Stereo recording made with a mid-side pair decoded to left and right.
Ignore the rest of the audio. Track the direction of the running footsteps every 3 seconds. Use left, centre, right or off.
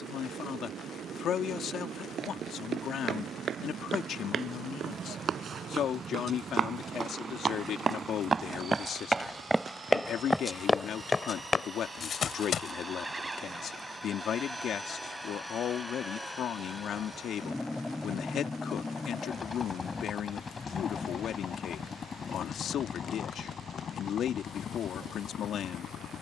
right, right, right, centre, left, off, off, off, off.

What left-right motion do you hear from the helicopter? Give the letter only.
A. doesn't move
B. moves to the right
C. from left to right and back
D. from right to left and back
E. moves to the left
E.